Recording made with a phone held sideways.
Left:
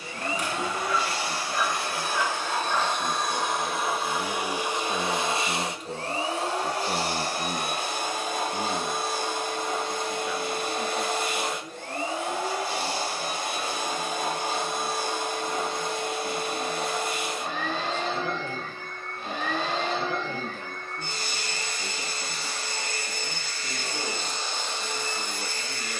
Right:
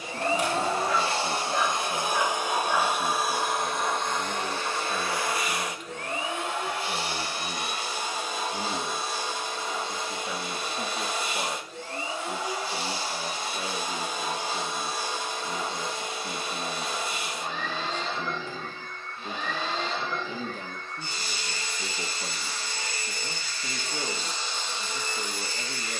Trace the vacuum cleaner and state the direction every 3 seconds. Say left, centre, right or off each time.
right, centre, left, left, left, left, left, left, left.